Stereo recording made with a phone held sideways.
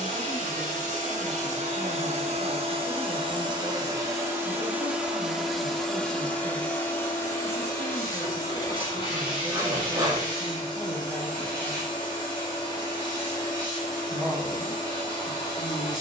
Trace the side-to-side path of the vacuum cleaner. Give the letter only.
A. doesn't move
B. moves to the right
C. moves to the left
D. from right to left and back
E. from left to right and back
C.